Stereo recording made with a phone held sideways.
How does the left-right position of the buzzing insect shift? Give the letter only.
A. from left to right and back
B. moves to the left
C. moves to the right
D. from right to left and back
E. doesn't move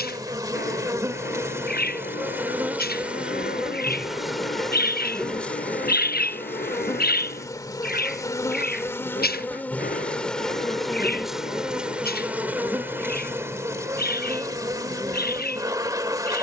D.